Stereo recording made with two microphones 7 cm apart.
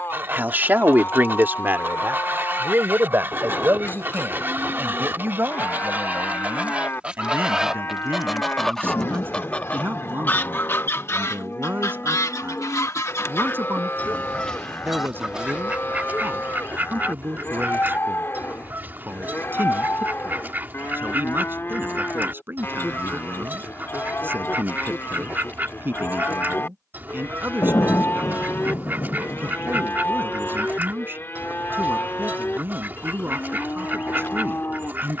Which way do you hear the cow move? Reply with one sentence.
You can hear the cow stay in one place.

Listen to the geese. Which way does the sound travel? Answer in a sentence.
In this clip you hear the geese move from right to left and back again.